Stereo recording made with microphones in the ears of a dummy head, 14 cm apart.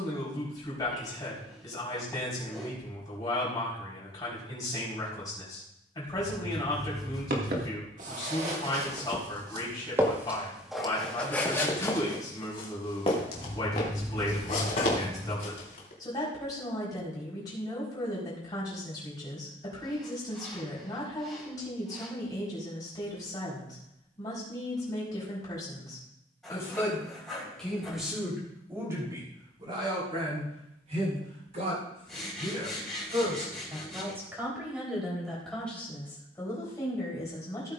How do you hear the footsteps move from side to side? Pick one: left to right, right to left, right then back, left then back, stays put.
right to left.